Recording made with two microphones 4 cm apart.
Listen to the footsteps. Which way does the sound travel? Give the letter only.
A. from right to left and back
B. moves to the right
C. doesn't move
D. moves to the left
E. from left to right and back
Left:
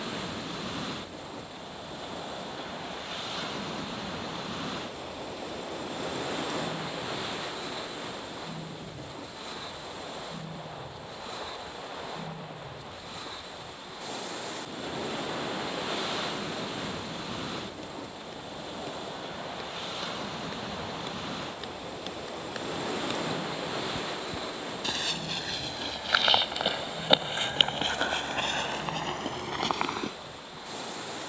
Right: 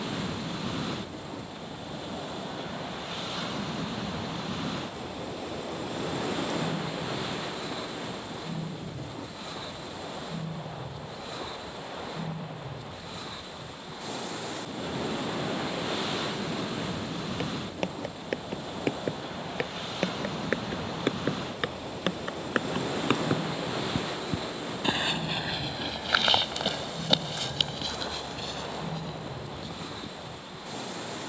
D.